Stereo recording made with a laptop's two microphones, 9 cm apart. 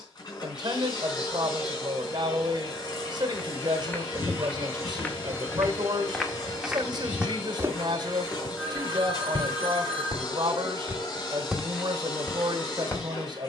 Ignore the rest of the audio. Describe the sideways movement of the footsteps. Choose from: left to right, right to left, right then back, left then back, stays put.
right then back.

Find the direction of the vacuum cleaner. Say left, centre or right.
left.